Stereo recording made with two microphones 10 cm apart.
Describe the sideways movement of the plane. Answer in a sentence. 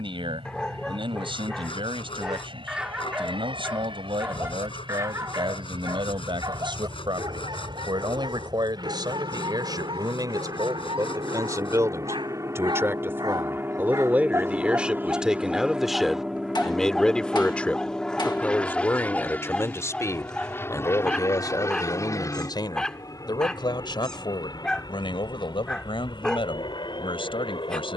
In this clip you hear the plane move to the left.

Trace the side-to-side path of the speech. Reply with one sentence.
You can hear the speech go from the right side to the left.